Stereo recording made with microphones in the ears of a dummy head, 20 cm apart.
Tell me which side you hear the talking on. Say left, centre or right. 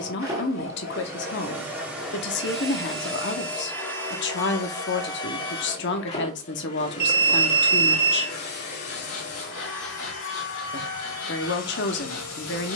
left.